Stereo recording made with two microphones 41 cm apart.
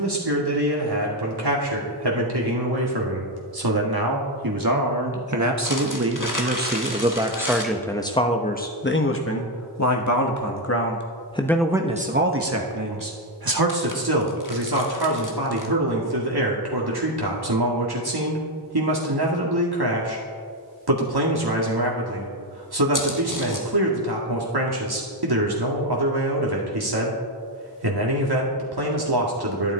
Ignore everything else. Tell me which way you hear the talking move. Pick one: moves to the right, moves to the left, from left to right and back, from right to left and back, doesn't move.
from right to left and back.